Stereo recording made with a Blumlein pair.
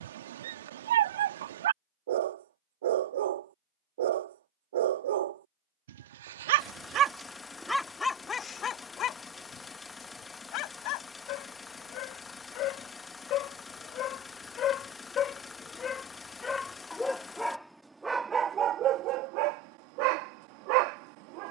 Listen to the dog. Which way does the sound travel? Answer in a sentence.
In this clip you hear the dog go left and come back.